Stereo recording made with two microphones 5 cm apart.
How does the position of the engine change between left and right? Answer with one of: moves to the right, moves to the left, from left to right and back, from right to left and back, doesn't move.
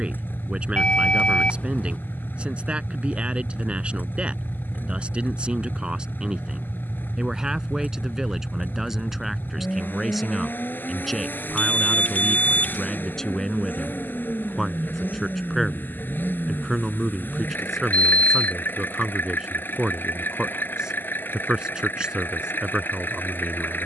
doesn't move.